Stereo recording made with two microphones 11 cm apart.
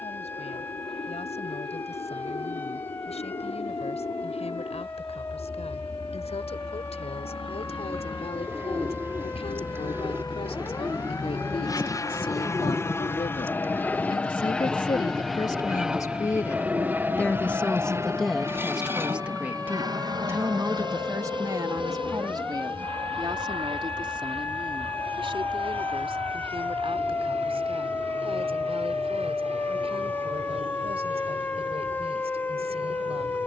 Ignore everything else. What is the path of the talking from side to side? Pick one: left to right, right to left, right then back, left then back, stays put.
left to right.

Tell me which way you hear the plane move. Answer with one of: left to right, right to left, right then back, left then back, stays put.
left to right.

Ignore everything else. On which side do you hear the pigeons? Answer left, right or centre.
right.